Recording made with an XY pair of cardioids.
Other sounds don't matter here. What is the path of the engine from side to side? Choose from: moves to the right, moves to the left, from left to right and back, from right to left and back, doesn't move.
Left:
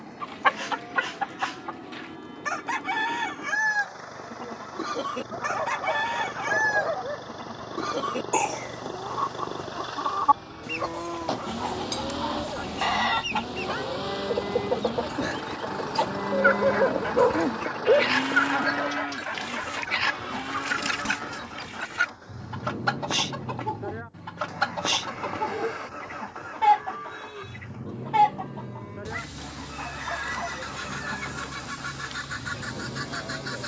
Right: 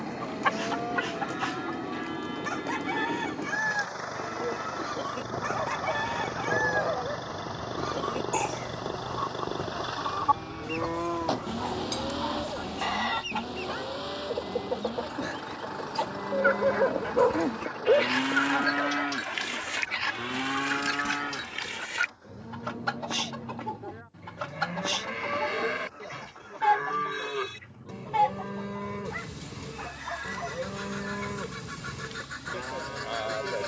moves to the left.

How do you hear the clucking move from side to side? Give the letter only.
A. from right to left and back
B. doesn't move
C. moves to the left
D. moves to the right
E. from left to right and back
B.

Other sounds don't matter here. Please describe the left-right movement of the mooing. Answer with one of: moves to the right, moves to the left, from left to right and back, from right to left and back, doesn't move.
from right to left and back.